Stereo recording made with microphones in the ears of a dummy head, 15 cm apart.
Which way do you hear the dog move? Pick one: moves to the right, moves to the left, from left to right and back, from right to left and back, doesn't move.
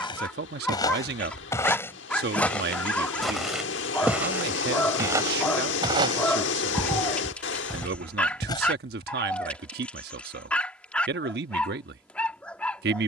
doesn't move.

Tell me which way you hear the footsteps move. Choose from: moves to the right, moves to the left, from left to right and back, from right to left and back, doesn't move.
from left to right and back.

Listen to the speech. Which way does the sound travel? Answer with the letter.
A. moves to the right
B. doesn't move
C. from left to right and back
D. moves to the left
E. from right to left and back
B.